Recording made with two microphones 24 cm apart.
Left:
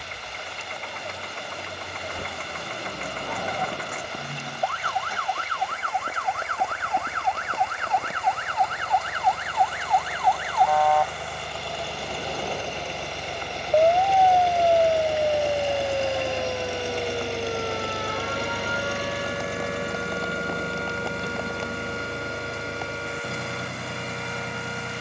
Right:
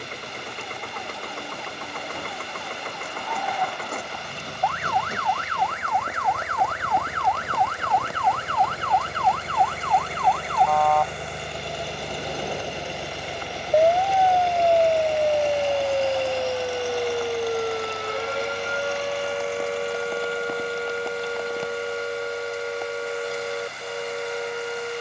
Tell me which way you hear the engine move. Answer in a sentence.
You can hear the engine go from the right side to the left.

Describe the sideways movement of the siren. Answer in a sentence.
In this clip you hear the siren go from the left side to the right.